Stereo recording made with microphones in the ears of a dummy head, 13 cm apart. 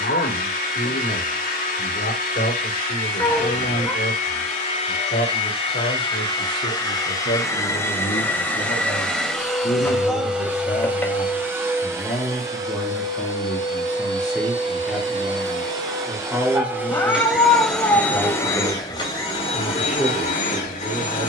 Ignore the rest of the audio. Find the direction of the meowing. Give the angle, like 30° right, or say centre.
10° left.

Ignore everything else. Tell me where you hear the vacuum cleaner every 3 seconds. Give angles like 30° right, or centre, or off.
60° left, 50° left, 20° left, 10° right, 30° right, 20° right, 40° left.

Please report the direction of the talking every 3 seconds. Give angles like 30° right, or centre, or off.
80° left, 80° left, 60° left, 40° left, 10° left, 10° right, 10° right.